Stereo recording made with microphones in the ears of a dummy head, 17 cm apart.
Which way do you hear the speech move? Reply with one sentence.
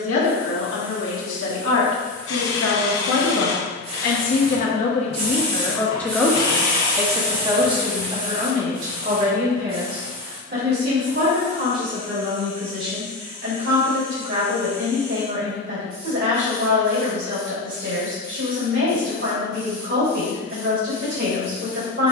You can hear the speech move to the right.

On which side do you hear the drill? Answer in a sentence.
You can hear the drill on the left.